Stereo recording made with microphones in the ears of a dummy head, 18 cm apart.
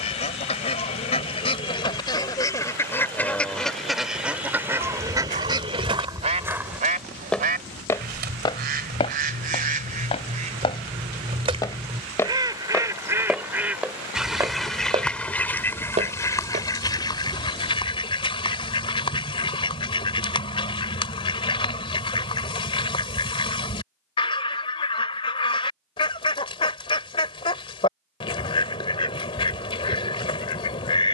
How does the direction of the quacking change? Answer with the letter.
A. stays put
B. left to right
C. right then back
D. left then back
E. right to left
C.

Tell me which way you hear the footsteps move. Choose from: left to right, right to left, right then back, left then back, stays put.
left then back.